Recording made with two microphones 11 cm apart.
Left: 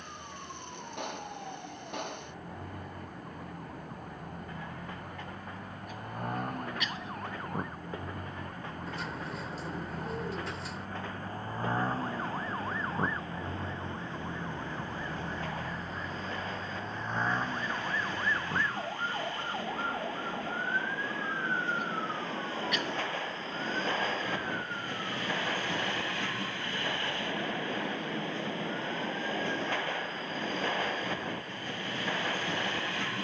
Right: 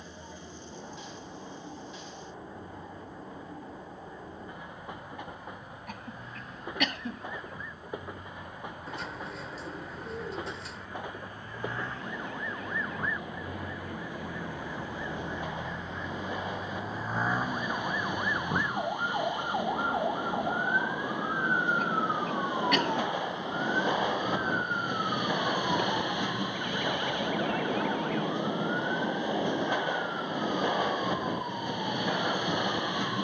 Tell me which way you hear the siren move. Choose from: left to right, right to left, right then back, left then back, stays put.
left to right.